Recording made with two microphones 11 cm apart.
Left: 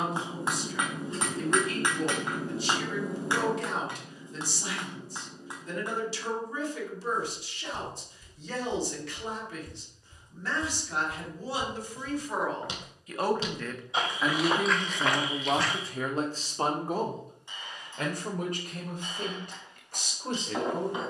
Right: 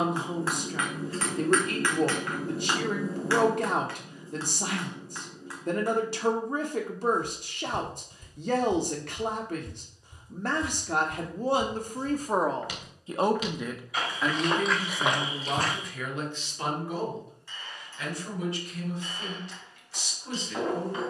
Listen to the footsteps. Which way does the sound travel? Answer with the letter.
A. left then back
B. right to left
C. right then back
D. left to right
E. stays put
A.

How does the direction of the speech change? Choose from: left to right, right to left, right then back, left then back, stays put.
right to left.